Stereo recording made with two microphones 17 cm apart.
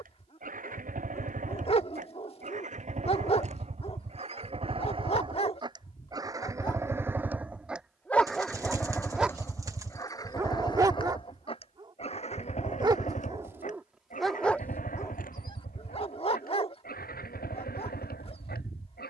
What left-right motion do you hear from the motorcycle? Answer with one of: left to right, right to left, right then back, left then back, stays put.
right to left.